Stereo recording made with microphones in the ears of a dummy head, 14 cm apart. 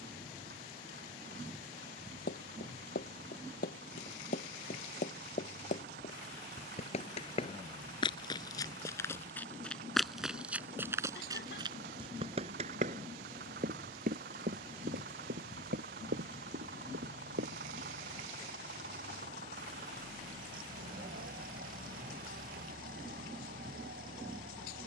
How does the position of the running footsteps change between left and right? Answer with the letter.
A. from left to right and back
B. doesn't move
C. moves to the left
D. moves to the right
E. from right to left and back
D.